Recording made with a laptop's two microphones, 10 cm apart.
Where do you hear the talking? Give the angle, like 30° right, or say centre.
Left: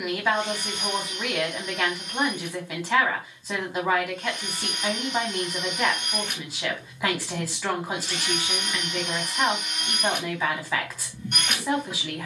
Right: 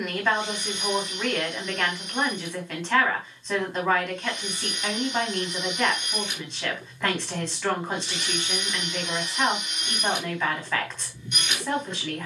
10° left.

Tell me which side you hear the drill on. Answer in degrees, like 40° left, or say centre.
50° left.